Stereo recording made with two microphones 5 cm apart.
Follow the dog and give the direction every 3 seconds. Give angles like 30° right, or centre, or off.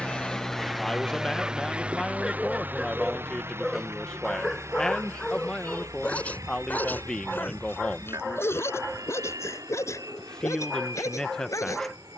20° right, 10° left, 40° left, 70° left.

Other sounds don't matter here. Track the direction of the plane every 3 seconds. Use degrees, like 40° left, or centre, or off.
10° right, 50° right, 60° right, 70° right.